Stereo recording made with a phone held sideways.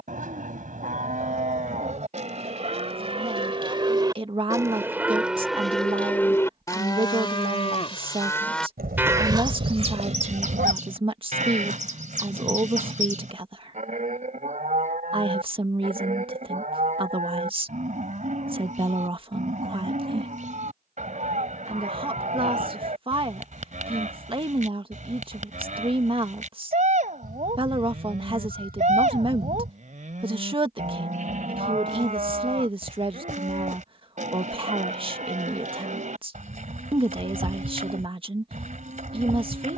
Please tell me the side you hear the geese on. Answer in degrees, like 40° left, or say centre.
70° right.